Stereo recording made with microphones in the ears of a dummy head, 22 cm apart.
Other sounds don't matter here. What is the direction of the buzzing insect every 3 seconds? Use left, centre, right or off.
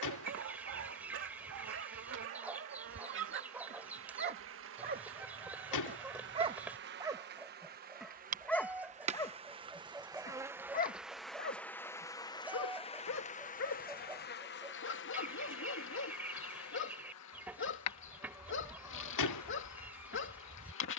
right, right, right, centre, left, left, left.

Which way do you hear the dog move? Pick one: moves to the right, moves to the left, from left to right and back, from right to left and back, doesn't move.
moves to the left.